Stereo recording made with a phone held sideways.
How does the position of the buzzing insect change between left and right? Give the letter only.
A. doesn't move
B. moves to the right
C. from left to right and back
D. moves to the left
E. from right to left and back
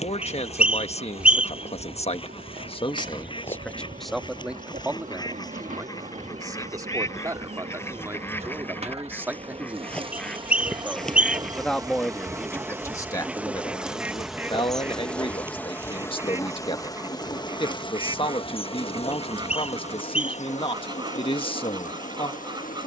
D.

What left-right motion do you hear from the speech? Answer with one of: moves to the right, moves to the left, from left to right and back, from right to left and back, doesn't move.
from left to right and back.